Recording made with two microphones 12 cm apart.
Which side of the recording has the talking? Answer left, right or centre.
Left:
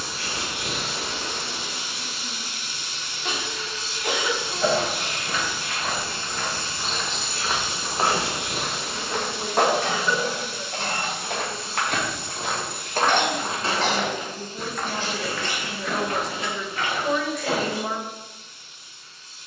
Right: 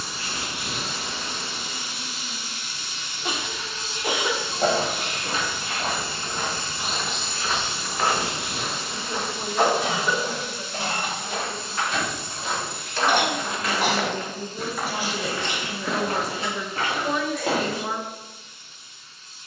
centre.